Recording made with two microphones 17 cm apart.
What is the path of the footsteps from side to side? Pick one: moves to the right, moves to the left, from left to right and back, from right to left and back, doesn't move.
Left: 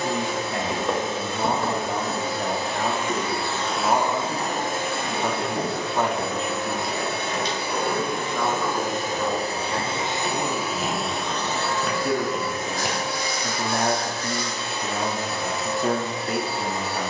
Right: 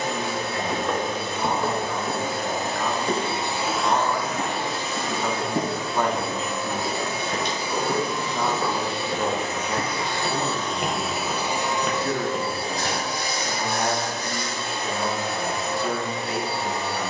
from left to right and back.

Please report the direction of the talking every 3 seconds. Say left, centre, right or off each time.
left, left, centre, centre, left, left.